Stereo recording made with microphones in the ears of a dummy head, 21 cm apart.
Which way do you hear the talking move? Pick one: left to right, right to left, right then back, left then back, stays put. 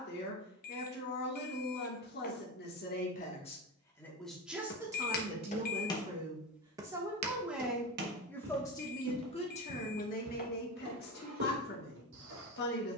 right then back.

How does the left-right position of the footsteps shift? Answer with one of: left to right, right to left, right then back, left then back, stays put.
left to right.